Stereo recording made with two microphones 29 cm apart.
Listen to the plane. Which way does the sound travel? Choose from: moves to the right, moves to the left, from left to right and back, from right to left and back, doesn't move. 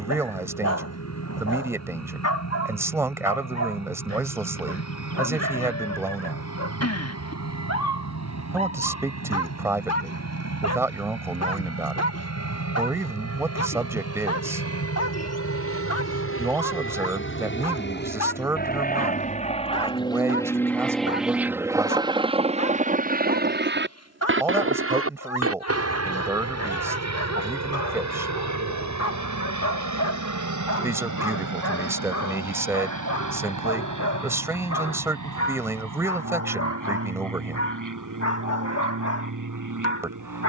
moves to the right.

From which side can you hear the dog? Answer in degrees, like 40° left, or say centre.
60° left.